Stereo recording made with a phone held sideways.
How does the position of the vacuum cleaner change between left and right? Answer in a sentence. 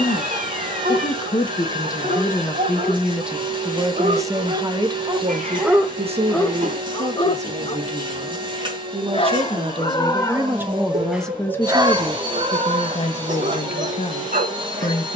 You can hear the vacuum cleaner stay in one place.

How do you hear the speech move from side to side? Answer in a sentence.
You can hear the speech move from left to right and back again.